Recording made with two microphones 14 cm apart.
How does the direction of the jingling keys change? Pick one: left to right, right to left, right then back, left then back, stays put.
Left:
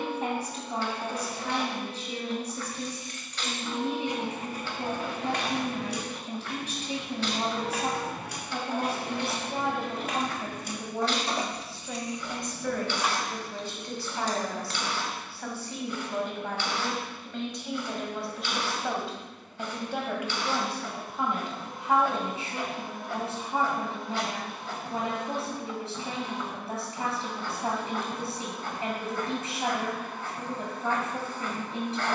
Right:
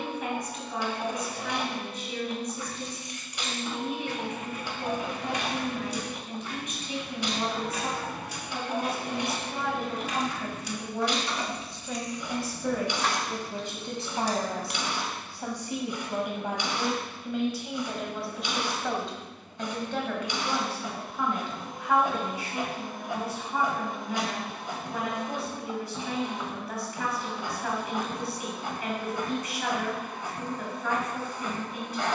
left then back.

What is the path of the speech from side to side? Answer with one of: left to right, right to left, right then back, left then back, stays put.
right then back.